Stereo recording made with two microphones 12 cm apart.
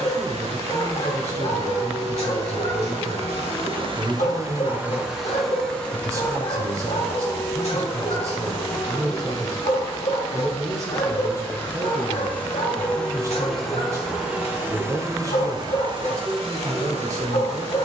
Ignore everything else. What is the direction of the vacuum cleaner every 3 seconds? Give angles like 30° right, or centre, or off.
80° right, 30° right, 20° left, 30° left, centre, 60° right.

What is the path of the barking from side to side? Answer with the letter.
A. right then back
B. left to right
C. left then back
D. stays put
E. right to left
D.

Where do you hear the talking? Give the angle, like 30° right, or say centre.
30° right.